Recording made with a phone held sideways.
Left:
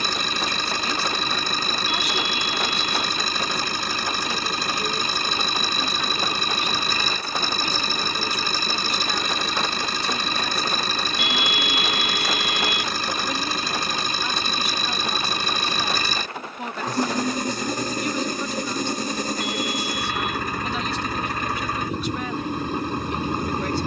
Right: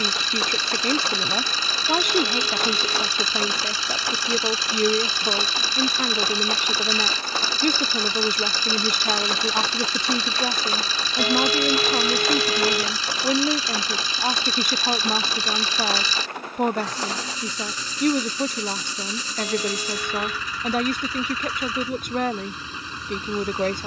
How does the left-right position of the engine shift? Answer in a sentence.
In this clip you hear the engine stay in one place.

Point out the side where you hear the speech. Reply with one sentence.
You can hear the speech on the right.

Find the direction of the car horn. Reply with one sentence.
In this clip you hear the car horn on the right.